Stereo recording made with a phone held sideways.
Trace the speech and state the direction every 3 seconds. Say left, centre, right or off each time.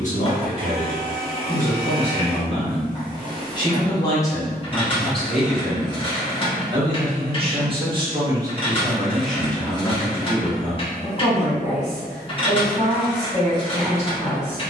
left, centre, right, left, left.